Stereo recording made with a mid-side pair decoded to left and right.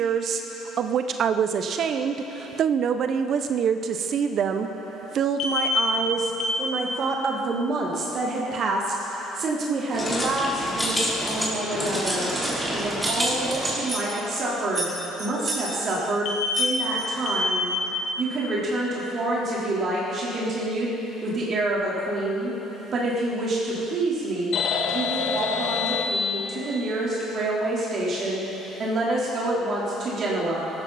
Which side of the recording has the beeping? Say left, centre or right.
left.